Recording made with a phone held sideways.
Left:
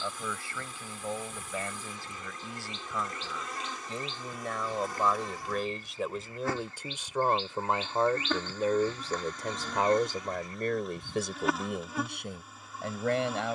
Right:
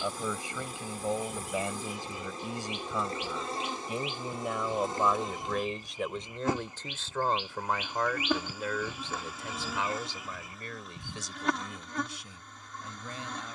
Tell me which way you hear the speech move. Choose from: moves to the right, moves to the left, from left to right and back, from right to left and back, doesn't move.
moves to the left.